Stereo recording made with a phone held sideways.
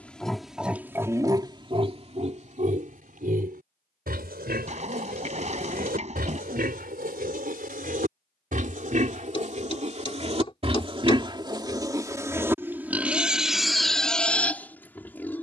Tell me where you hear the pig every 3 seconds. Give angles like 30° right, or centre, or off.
30° right, 70° right, 60° right, 40° right, centre.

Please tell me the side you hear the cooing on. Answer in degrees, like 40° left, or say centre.
40° right.